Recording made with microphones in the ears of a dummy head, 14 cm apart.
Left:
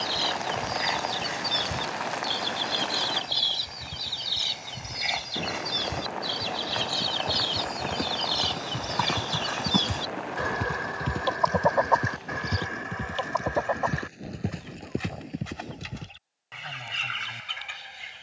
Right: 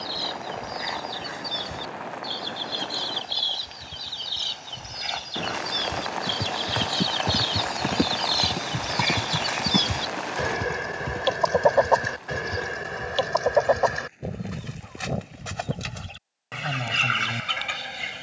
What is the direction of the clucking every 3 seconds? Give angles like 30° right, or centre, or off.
20° left, 10° left, centre, 30° right, 50° right, 70° right.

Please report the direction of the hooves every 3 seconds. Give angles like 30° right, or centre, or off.
off, off, 40° right, centre, 40° left, 50° left.